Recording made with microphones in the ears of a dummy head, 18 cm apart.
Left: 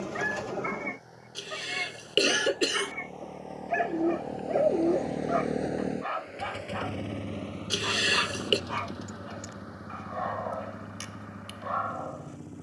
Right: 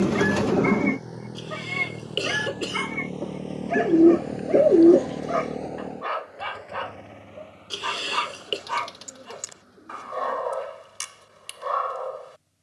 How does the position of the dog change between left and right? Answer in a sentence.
In this clip you hear the dog stay put.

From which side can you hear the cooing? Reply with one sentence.
You can hear the cooing on the right.